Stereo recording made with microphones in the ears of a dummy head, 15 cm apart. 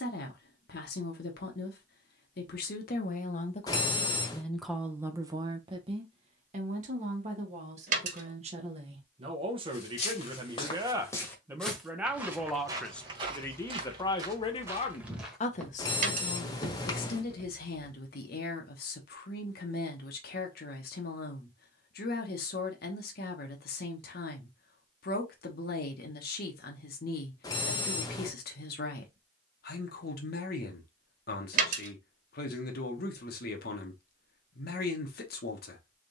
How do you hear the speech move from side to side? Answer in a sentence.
In this clip you hear the speech move from left to right and back again.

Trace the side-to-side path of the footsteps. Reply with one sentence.
In this clip you hear the footsteps go right and come back.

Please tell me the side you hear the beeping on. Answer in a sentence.
In this clip you hear the beeping on the left.